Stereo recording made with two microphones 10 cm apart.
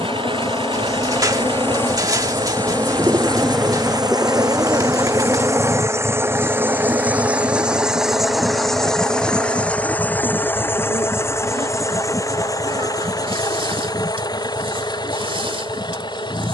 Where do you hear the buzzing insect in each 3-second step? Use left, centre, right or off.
left, centre, right, right, right, right.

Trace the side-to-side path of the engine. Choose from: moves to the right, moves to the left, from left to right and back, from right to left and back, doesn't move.
moves to the left.